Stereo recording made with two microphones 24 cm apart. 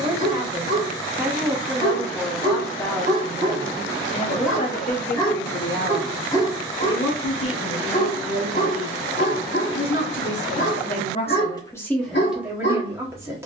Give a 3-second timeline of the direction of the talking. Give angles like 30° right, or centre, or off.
centre, 30° left, 60° left, 40° left, 10° right.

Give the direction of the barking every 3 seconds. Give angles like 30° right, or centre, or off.
20° right, 10° right, 30° left, 50° left, 50° left.